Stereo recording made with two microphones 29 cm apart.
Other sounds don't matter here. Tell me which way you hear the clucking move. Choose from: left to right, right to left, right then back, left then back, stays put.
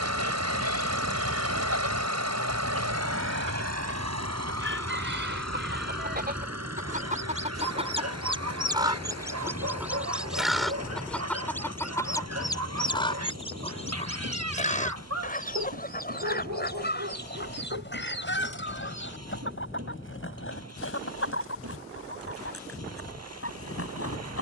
right to left.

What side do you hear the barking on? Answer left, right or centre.
right.